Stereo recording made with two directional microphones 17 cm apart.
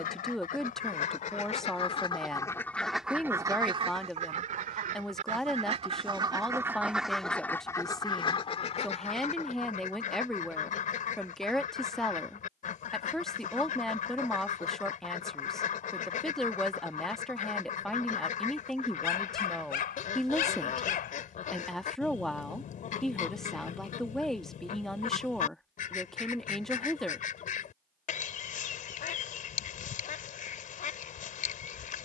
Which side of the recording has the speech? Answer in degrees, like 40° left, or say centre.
centre.